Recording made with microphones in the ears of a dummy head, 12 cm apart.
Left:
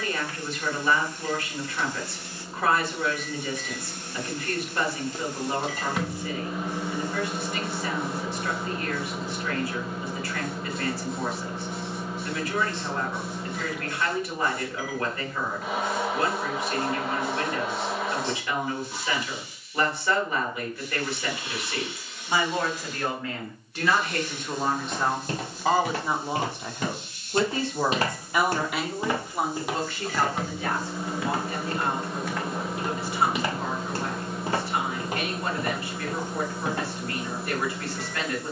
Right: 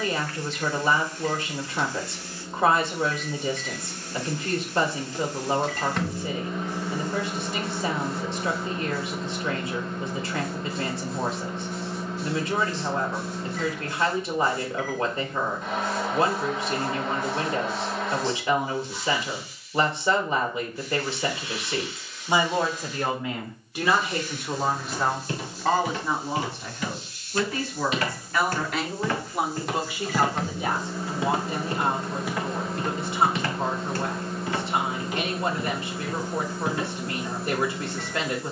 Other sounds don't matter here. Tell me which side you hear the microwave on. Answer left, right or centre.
centre.